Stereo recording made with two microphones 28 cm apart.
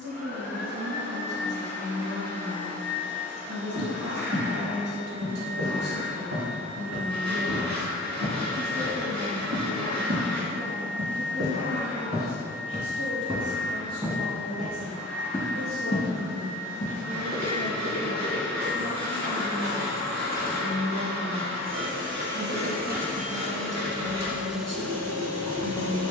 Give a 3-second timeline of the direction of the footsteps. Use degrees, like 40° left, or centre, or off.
off, 80° right, 70° right, 50° right, 20° right, 30° left, 40° left, off, off.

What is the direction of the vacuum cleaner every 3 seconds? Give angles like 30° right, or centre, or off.
70° right, 70° right, 70° right, 70° right, 70° right, 70° right, 60° right, 40° right, 10° left.